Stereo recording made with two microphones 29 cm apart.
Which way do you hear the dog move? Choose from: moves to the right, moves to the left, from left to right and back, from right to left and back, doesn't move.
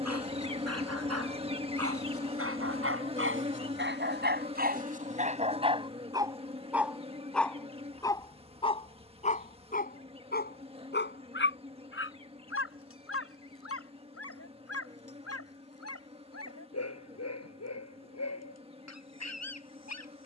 moves to the left.